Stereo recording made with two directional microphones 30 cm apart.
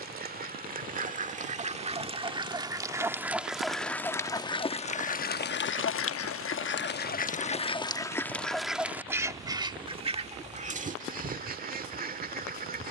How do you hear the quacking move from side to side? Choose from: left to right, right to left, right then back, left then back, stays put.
left then back.